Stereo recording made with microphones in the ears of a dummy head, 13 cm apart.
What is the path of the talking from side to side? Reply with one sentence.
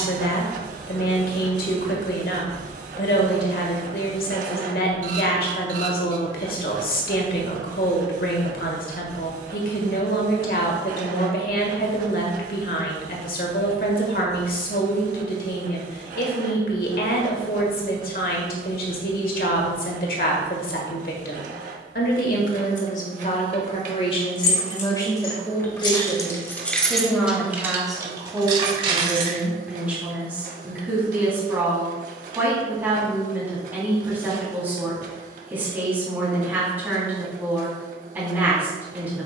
In this clip you hear the talking move to the right.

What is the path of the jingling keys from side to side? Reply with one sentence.
You can hear the jingling keys move from left to right.